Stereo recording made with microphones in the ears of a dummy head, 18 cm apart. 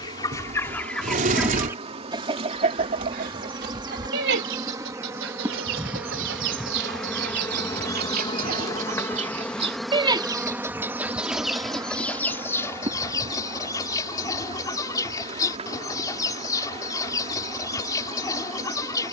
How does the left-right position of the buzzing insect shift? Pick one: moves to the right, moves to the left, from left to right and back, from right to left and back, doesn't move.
from right to left and back.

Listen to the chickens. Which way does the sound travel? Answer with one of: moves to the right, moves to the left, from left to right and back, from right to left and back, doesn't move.
from left to right and back.